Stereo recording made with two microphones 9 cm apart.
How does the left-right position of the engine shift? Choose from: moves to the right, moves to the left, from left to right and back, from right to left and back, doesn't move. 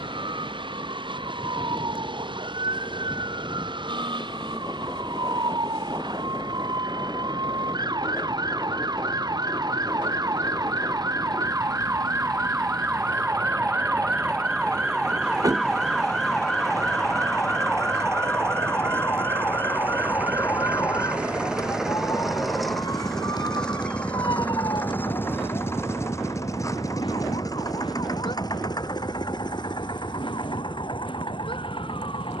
moves to the left.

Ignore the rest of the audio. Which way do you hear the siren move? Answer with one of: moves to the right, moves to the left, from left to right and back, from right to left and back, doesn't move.
moves to the left.